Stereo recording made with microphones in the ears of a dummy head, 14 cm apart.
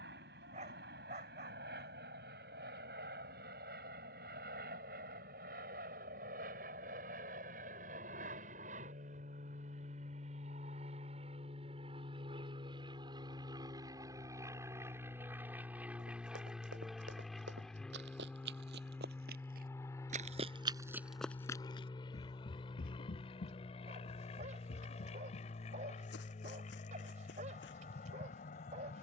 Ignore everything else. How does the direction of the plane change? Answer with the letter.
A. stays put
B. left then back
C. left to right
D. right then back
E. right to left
E.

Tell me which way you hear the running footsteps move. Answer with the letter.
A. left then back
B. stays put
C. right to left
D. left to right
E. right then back
C.